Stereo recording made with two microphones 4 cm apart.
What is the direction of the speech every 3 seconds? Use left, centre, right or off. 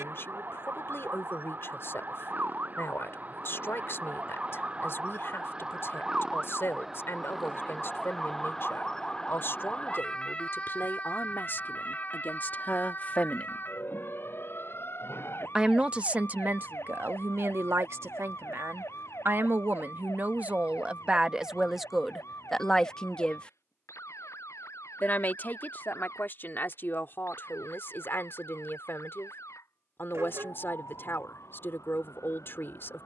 left, left, left, left, left, right, right, centre, left, left, left.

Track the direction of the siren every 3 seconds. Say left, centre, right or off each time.
right, right, centre, left, left, left, left, left, left, left, left.